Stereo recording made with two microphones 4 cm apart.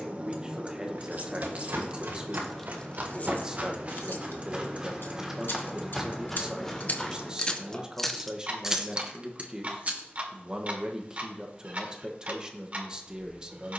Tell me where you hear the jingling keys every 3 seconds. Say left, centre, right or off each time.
right, left, centre, right, off.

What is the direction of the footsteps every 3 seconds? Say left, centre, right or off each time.
right, right, centre, off, off.